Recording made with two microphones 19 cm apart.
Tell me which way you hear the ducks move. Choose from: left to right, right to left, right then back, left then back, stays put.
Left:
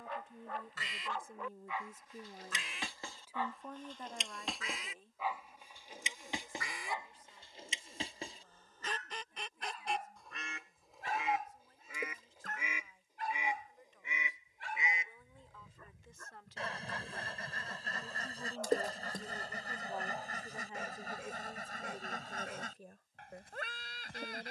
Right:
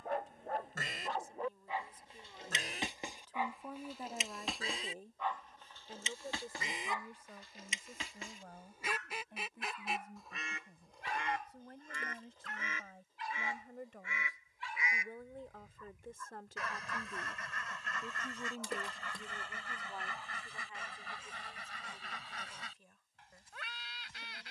right to left.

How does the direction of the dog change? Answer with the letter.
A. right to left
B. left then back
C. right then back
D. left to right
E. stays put
A.